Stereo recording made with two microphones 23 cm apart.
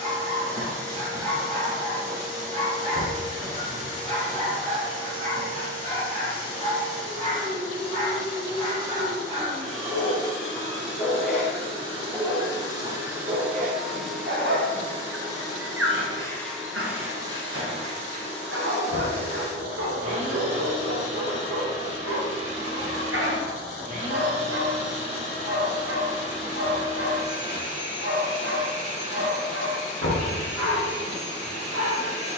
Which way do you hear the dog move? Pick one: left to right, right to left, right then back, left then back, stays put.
left to right.